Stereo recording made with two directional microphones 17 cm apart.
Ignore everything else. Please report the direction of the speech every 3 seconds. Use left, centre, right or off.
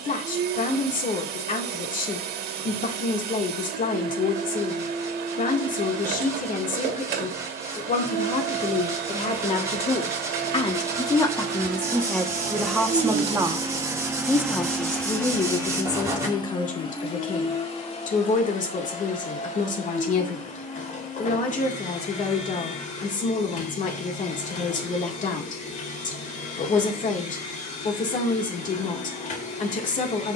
left, left, left, left, centre, left, left, left, left, left.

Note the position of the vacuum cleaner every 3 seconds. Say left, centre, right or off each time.
right, right, right, right, right, left, left, left, left, left.